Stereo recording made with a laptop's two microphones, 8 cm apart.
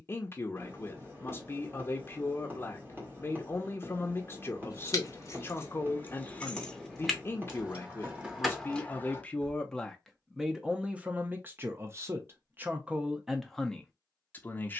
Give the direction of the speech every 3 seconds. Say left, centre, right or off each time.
left, left, left, centre, centre.